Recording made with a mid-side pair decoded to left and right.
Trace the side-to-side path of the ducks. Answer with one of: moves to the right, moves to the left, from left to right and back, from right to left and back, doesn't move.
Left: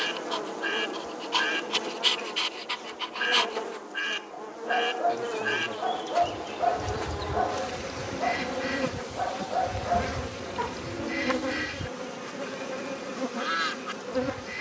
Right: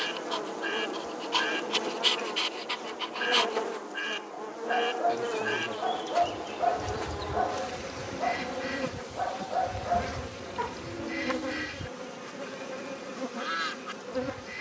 doesn't move.